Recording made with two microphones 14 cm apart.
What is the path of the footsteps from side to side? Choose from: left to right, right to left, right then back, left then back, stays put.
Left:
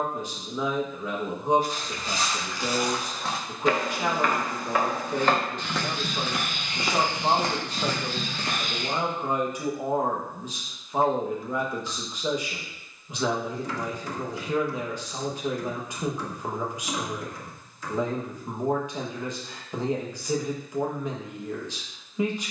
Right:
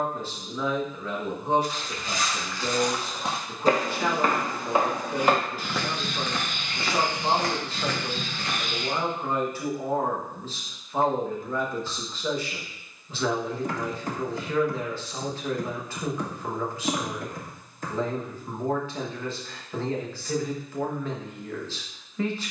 right then back.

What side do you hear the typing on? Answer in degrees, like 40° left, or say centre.
50° right.